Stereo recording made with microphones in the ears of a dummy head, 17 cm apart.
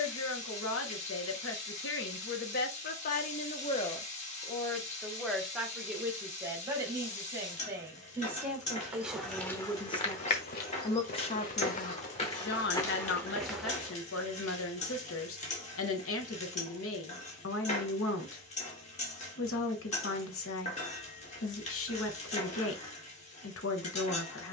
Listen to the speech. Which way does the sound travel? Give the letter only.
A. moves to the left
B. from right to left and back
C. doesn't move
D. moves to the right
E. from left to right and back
E.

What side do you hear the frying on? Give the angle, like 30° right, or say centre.
40° left.